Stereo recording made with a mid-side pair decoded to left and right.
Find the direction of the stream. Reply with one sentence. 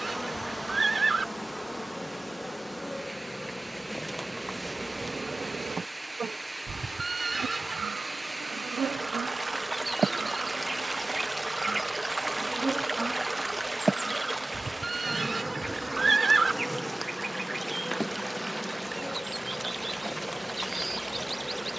You can hear the stream in the centre.